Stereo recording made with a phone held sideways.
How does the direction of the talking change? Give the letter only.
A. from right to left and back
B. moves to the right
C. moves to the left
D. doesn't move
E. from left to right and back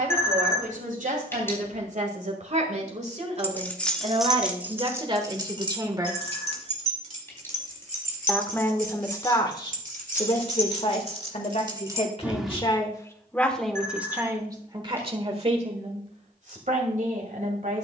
A.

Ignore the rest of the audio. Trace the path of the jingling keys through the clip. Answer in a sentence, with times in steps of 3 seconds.
You can hear the jingling keys not at all from 0 s, in the centre from 3 s, on the right from 6 s, in the centre from 12 s and not at all from 15 s.